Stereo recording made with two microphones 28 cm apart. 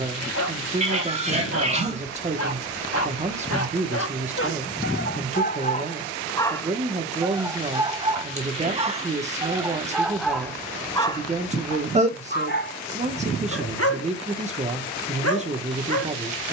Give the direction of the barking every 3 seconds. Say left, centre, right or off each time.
left, left, centre, centre, left, left.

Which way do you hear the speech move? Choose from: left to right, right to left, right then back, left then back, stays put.
stays put.